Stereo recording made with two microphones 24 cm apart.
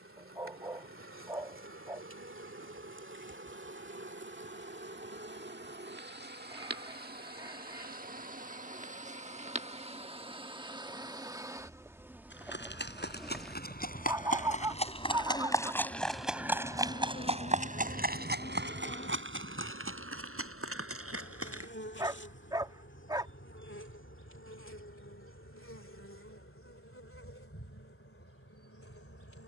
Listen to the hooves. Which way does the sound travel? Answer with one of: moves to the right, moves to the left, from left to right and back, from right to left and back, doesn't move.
moves to the right.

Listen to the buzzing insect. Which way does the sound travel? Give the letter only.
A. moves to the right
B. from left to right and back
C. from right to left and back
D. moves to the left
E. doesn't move
D.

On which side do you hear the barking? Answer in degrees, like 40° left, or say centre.
20° right.